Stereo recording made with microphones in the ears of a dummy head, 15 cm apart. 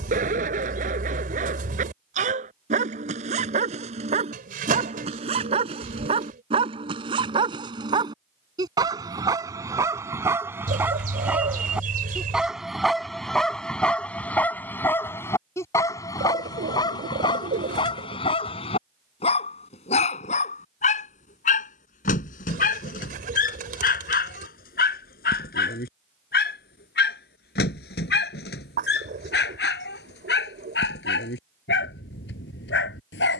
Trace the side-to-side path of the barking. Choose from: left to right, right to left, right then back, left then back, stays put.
right to left.